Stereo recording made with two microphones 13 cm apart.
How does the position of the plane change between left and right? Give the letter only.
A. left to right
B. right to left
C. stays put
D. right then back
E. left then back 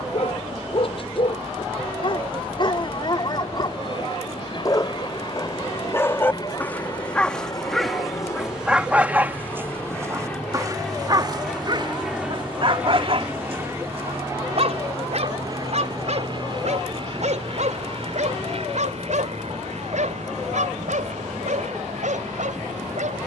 A.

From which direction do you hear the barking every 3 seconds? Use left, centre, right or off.
left, left, centre, right, right, right, right, right.